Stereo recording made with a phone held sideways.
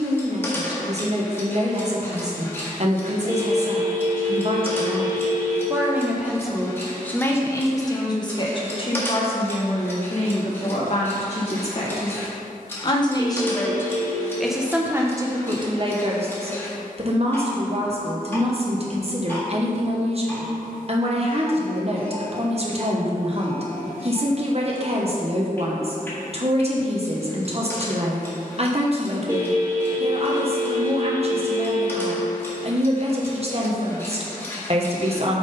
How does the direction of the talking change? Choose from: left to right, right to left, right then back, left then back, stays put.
left then back.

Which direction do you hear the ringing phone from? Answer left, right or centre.
right.